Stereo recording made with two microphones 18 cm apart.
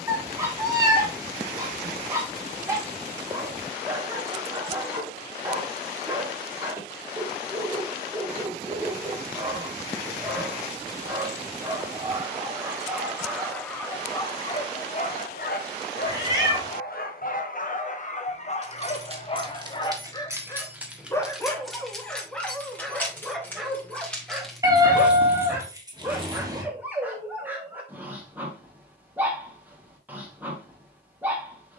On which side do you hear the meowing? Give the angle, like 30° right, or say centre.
20° right.